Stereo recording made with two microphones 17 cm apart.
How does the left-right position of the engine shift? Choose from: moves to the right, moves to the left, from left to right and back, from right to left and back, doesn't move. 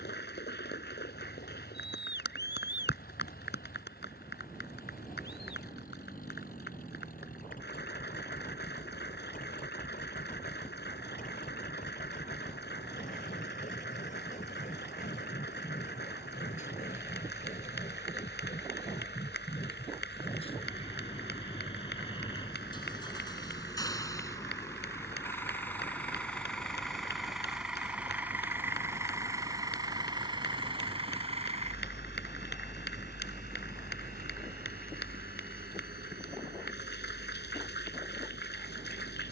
moves to the right.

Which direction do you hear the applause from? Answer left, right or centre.
left.